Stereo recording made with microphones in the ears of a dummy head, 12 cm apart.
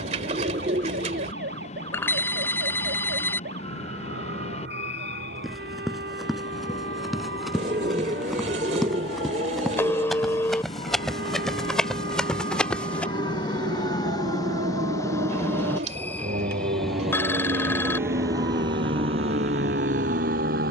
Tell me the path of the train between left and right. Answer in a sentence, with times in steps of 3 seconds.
You can hear the train on the left from 0 s, in the centre from 15 s and on the right from 18 s.